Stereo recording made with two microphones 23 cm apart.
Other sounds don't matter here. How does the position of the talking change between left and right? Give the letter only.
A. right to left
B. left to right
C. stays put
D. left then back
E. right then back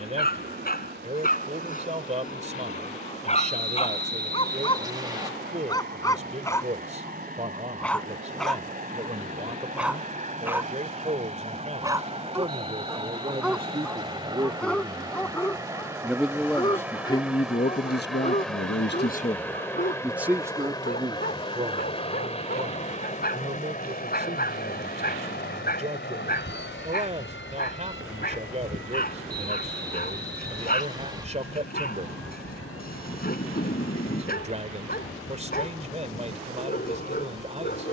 D.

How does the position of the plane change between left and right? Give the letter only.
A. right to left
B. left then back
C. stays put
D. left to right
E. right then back
A.